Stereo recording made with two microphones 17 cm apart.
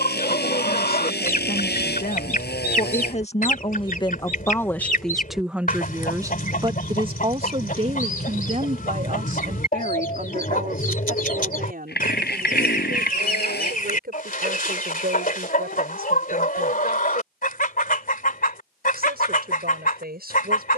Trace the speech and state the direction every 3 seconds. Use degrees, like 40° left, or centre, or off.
60° left, 20° left, 30° right, 60° right, 60° right, 70° right, 70° right.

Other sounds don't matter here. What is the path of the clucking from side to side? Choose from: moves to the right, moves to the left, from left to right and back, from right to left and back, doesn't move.
doesn't move.